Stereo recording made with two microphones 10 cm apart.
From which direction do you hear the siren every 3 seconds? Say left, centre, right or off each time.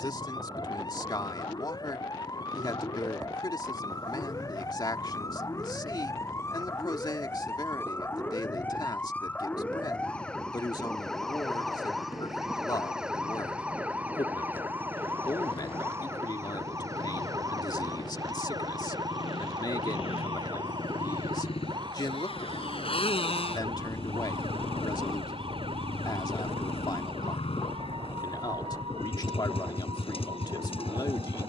left, left, left, centre, centre, right, right, right, right, right, right.